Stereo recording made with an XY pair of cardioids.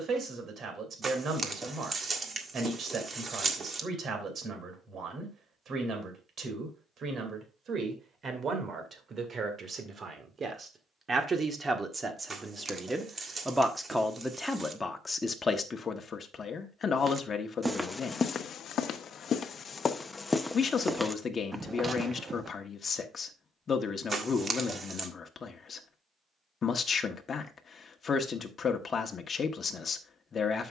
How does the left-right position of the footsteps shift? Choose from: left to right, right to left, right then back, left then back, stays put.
left then back.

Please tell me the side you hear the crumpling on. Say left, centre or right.
right.